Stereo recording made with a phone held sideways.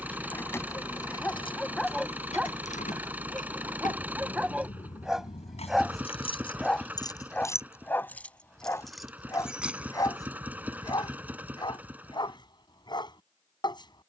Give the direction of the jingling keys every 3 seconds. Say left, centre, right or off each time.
left, left, left, centre, off.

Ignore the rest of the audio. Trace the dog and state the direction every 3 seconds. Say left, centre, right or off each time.
centre, centre, centre, left, left.